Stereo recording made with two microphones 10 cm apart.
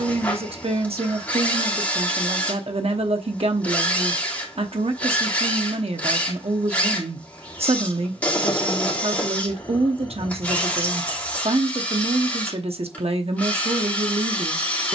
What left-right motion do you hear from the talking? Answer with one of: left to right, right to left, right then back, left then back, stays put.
stays put.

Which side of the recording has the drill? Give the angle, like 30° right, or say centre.
20° left.